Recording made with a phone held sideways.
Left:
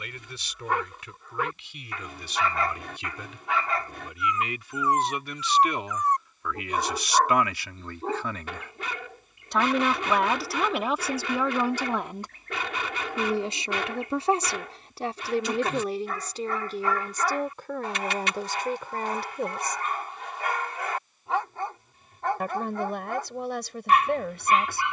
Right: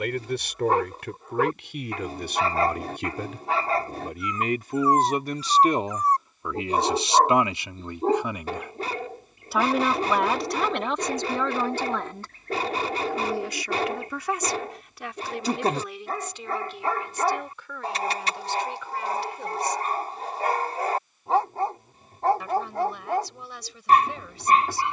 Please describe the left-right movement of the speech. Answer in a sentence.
In this clip you hear the speech travel towards the left.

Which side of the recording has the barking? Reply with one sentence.
You can hear the barking on the right.